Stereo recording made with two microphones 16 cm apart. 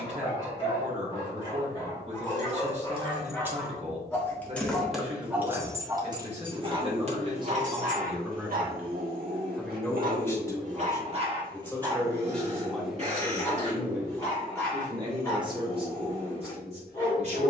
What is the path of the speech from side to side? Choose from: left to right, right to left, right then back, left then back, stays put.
left then back.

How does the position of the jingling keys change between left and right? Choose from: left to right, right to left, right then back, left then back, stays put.
left then back.